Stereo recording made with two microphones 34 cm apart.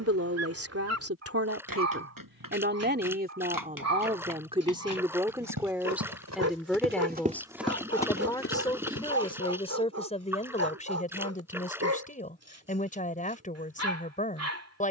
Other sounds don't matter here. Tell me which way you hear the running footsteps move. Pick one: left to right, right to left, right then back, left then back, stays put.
right to left.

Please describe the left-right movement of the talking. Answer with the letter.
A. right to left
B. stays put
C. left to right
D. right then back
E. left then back
A.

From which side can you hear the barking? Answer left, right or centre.
right.